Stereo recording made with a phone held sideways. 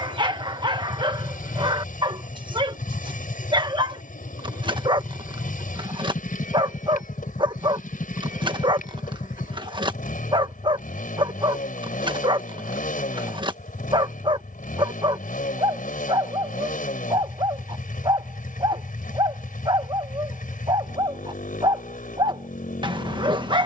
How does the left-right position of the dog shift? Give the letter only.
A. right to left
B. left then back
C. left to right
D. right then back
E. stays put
E.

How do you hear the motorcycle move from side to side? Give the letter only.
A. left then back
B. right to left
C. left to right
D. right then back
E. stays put
E.